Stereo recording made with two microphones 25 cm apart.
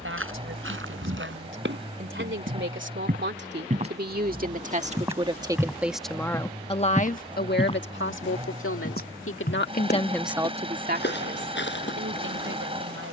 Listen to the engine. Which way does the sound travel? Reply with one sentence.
In this clip you hear the engine stay put.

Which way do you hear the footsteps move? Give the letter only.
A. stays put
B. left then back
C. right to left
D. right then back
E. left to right
C.